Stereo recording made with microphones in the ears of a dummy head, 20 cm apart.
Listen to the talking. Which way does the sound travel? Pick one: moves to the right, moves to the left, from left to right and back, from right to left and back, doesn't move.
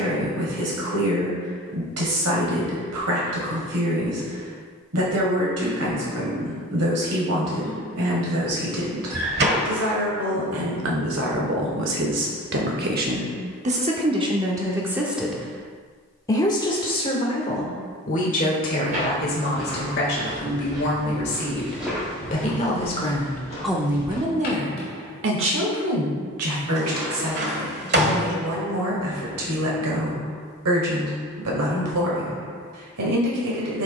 from right to left and back.